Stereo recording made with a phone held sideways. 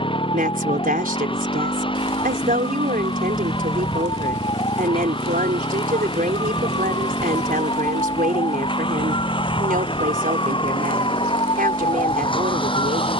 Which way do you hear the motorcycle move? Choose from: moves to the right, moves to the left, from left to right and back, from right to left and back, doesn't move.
doesn't move.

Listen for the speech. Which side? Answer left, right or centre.
right.